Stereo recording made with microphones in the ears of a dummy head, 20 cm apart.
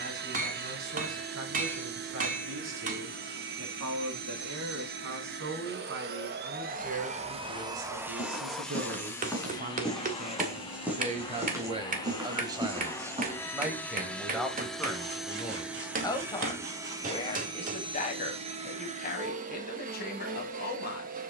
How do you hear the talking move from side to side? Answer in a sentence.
In this clip you hear the talking go from the right side to the left.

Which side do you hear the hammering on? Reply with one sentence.
You can hear the hammering on the right.